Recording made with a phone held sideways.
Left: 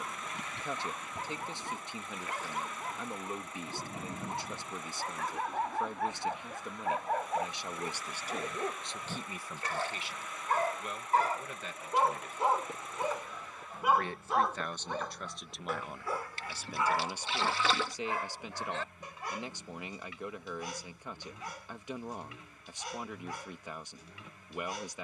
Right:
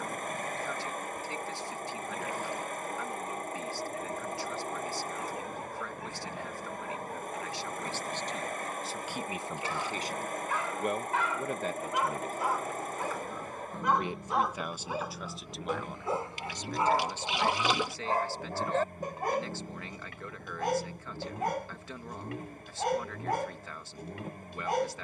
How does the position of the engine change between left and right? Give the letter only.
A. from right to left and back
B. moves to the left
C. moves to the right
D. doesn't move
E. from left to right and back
D.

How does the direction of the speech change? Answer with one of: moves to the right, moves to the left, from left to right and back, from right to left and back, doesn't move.
from left to right and back.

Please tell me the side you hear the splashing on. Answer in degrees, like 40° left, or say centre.
20° right.